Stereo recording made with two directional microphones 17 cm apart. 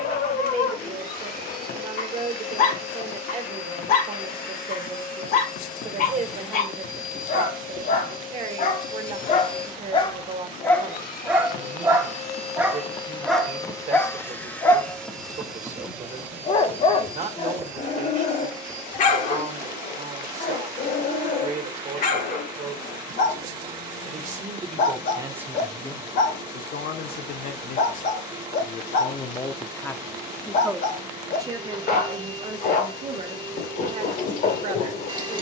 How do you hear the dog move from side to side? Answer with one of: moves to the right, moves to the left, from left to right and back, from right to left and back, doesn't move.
from left to right and back.